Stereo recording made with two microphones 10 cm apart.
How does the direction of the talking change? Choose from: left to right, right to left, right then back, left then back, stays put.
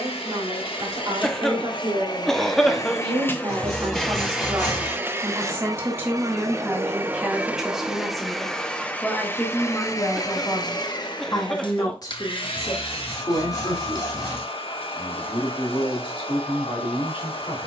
right to left.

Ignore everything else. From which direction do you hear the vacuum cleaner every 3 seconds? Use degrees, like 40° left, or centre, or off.
50° left, 10° right, 10° right, 40° left, 60° left, 60° left.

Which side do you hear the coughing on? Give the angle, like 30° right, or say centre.
centre.